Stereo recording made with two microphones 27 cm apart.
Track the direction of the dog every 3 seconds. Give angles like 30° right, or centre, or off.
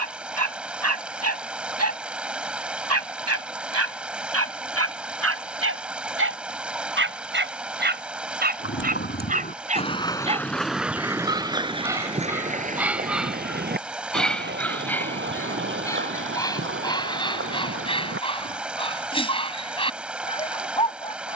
70° right, 60° right, 40° right, 20° right, centre, 10° left, 20° left.